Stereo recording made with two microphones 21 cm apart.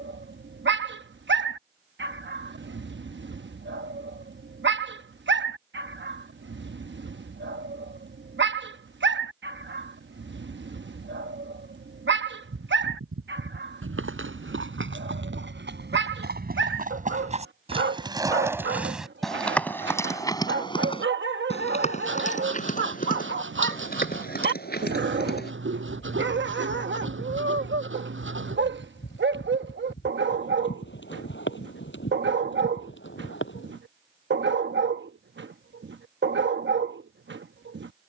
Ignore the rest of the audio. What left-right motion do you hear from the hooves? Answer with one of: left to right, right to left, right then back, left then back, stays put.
right to left.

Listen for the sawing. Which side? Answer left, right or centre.
right.